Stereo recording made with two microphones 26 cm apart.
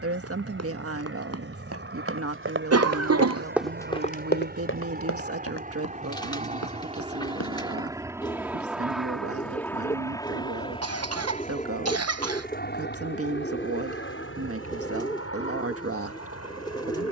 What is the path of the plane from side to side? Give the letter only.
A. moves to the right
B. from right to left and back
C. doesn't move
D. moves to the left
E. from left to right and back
D.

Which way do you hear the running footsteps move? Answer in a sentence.
You can hear the running footsteps move from right to left.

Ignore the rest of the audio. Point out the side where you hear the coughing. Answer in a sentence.
You can hear the coughing on the right.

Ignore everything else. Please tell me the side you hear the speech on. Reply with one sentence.
You can hear the speech on the right.